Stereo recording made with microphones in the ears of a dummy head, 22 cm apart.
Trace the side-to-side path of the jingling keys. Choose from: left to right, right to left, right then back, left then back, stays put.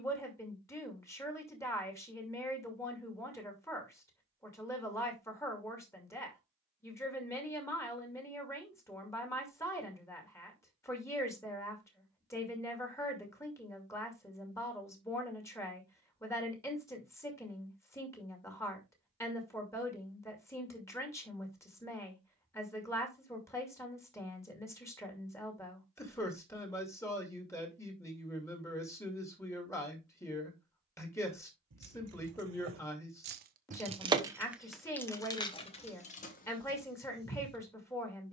right to left.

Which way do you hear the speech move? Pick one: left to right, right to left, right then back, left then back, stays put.
stays put.